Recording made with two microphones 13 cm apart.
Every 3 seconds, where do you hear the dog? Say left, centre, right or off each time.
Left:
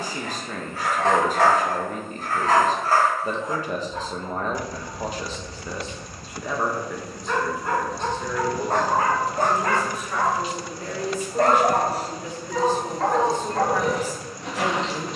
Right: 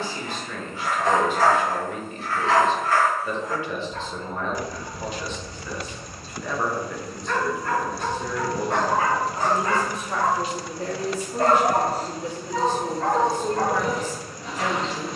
left, centre, left, left, left.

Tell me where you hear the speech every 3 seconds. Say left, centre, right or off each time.
left, left, centre, right, centre.